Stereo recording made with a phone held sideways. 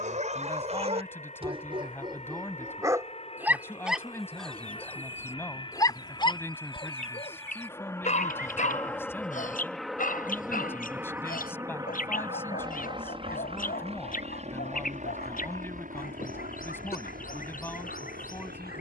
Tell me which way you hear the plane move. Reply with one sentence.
You can hear the plane move to the right.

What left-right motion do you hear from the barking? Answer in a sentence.
In this clip you hear the barking move to the left.